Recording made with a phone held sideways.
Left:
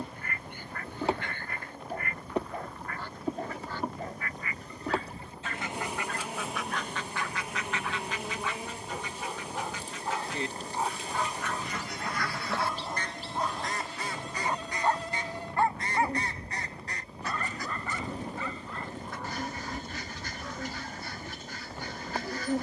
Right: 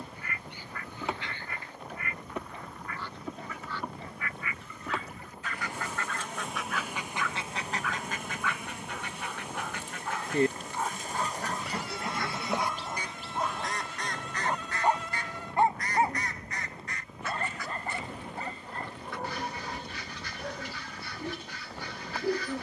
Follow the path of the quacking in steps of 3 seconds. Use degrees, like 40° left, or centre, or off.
50° left, 40° left, 30° right, 50° right, centre, 30° left, 40° left, 40° left.